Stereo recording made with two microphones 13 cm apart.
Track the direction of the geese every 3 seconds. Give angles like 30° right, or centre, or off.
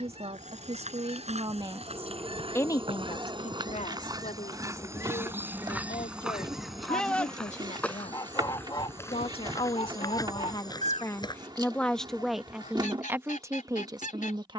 50° right, 30° right, 10° left, 50° left, 70° left.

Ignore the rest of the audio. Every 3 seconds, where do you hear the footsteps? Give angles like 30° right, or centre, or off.
50° right, 20° right, 10° left, 30° left, off.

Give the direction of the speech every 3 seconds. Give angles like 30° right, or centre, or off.
30° right, 60° left, 60° left, 30° left, 20° right.